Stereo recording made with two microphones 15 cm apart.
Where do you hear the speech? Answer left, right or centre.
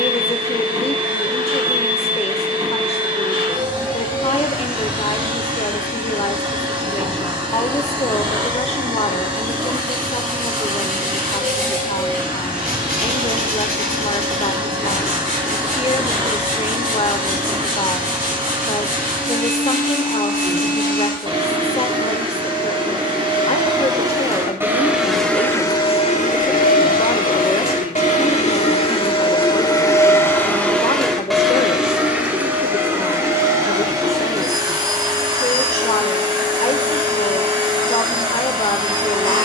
left.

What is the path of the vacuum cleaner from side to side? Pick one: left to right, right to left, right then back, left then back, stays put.
left then back.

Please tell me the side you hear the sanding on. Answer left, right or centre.
right.